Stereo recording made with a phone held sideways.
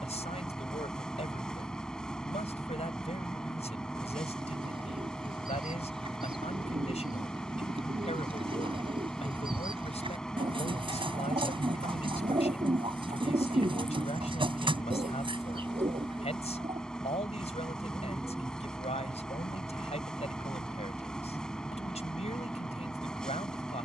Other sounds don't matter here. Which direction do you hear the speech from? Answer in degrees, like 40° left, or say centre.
50° left.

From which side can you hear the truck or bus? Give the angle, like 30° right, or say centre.
10° left.